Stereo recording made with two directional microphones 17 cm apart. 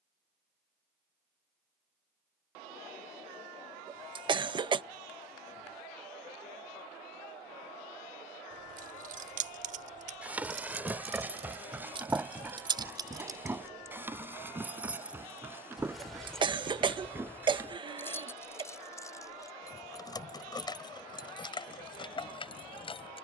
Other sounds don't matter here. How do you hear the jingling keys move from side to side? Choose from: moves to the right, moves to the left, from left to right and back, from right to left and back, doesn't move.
moves to the left.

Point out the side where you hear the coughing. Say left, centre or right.
right.